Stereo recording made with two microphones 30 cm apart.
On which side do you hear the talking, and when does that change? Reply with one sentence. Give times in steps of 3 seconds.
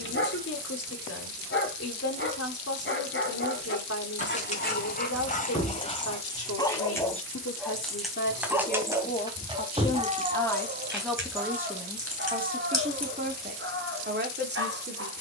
In this clip you hear the talking on the left from 0 s, in the centre from 9 s and on the right from 12 s.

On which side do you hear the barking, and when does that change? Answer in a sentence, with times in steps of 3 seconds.
In this clip you hear the barking on the left from 0 s, in the centre from 6 s and on the right from 9 s.